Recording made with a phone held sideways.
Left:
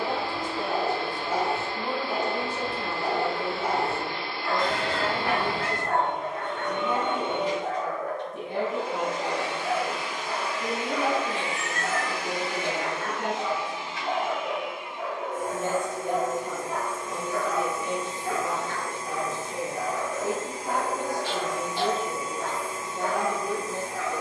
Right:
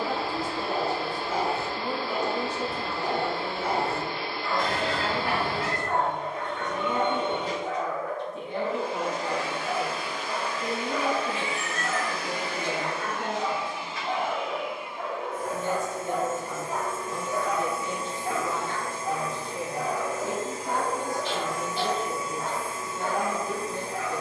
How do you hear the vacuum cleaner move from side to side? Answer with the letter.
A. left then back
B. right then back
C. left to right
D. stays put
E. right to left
E.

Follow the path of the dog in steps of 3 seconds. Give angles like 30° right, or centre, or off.
40° left, 40° left, 40° left, 40° left, 30° left, centre, 40° right, 40° right.